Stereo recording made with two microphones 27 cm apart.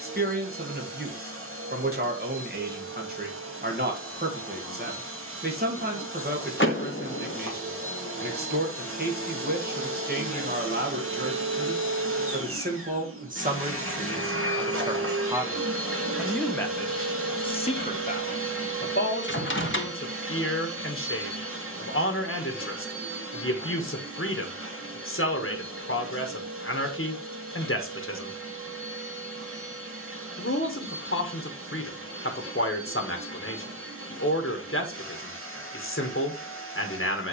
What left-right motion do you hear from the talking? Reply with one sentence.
You can hear the talking move to the left.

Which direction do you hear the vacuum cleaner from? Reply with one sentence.
You can hear the vacuum cleaner on the right.